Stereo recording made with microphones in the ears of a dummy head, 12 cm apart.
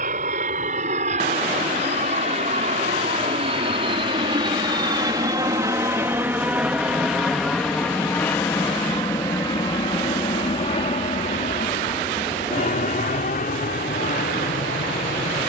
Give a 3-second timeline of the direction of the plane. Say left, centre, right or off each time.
right, right, centre, left, left.